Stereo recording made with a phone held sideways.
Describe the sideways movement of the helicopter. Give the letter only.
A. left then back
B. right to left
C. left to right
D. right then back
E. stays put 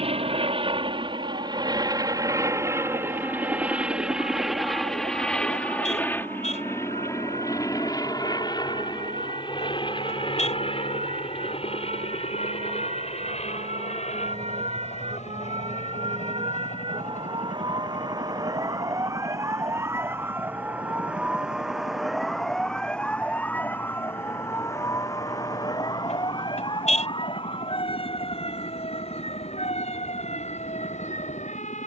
B.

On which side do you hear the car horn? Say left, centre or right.
left.